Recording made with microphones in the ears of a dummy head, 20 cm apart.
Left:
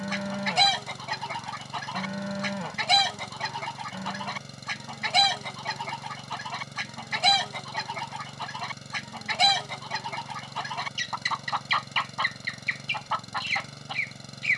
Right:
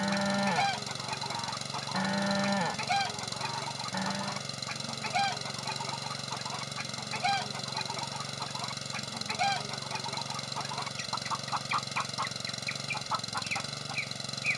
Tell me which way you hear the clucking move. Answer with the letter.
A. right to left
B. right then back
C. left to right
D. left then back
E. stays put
E.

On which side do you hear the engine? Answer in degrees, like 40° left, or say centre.
30° right.